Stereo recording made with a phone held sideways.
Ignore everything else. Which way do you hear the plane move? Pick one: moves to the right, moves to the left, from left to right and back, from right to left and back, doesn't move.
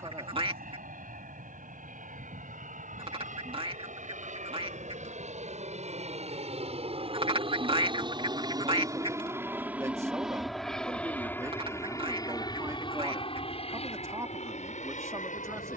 moves to the left.